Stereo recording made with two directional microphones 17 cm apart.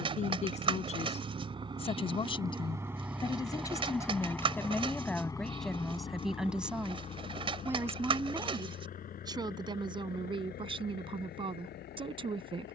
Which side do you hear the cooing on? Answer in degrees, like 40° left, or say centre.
30° right.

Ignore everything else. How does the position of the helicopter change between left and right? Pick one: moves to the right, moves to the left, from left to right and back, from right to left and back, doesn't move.
moves to the left.